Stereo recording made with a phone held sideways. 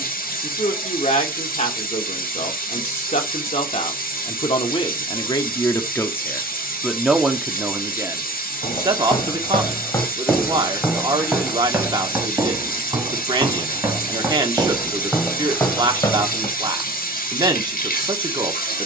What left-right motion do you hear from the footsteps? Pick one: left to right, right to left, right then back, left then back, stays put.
right then back.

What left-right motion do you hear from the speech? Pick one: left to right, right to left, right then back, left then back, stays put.
left to right.